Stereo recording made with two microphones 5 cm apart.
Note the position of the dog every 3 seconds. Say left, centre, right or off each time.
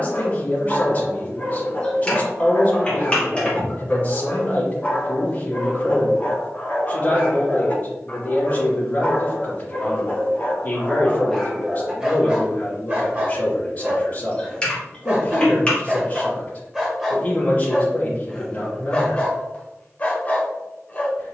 left, left, left, left, right, centre, left.